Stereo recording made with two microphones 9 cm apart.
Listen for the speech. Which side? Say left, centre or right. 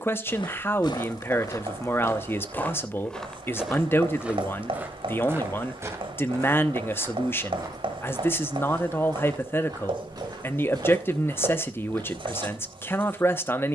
left.